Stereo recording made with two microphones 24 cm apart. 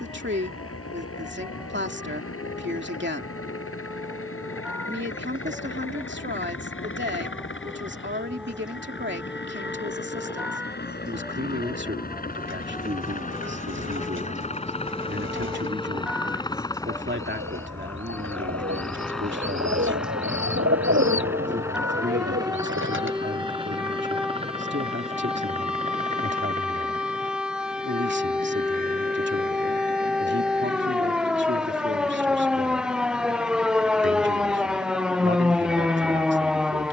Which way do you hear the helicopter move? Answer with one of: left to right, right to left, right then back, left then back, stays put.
left to right.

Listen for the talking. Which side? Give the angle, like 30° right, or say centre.
50° right.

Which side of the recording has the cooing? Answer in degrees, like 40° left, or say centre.
50° right.